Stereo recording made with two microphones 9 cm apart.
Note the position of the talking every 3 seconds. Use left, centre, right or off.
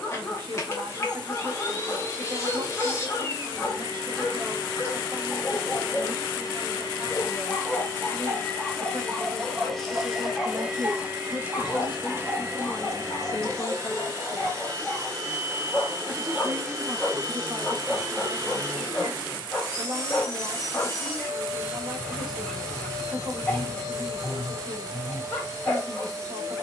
right, right, right, right, left, right, right, right, right.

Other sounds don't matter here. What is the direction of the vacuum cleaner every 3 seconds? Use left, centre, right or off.
left, left, left, centre, right, right, right, right, right.